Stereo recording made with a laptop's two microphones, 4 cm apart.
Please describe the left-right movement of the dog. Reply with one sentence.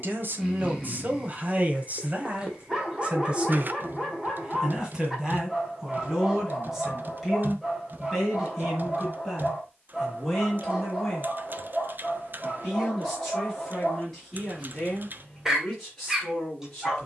You can hear the dog stay put.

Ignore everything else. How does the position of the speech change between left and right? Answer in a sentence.
In this clip you hear the speech move from right to left.